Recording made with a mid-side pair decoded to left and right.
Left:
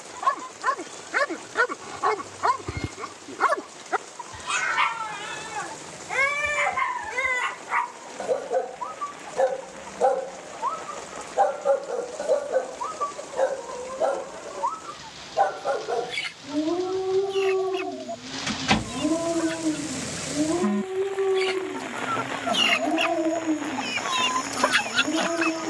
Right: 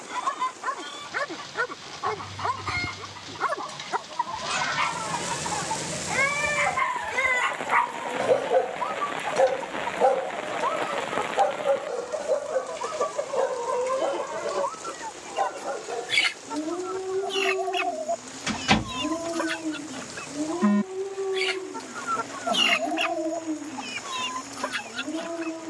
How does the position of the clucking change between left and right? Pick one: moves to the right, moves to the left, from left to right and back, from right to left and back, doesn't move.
moves to the left.